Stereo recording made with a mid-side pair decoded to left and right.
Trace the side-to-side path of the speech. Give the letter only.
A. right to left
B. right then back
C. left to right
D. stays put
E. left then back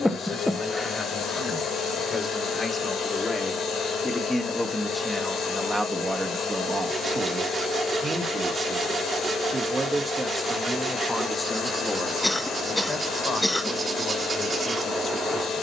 B.